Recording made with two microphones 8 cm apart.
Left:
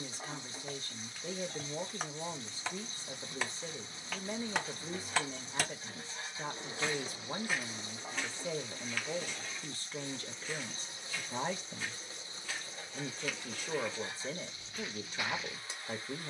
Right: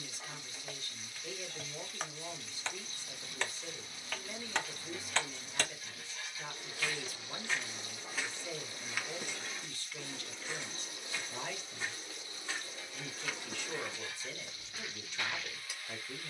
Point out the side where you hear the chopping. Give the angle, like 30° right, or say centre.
10° left.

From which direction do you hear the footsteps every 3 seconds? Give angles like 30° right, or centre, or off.
off, off, 10° left, 20° right, 20° right, 10° left.